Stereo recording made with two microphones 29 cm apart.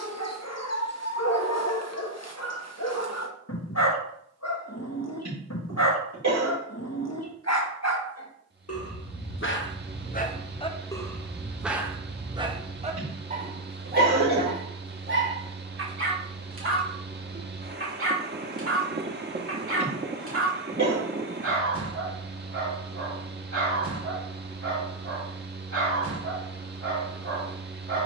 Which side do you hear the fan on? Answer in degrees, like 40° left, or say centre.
40° right.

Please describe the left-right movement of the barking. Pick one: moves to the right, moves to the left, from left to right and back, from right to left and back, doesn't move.
moves to the right.